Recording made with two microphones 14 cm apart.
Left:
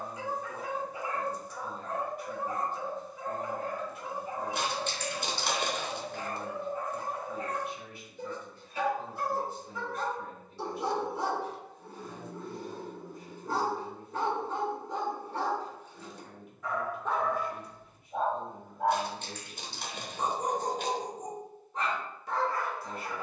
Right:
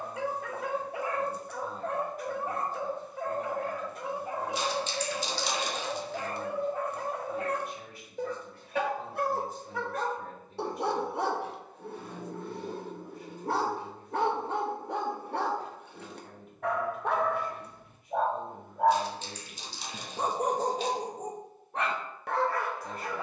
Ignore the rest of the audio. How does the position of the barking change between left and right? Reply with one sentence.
You can hear the barking stay put.